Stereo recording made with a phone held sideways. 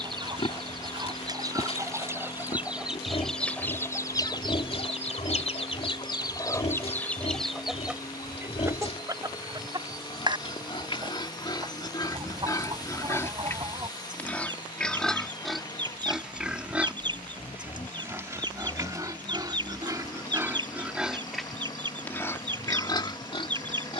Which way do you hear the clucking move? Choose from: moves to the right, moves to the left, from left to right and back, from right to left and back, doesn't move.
from right to left and back.